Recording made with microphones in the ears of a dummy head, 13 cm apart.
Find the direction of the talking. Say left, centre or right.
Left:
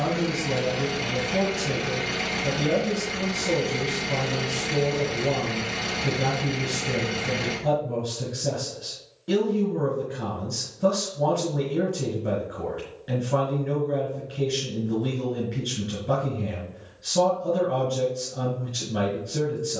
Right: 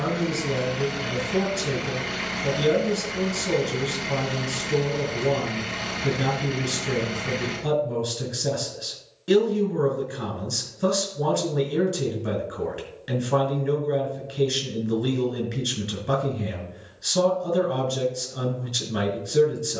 right.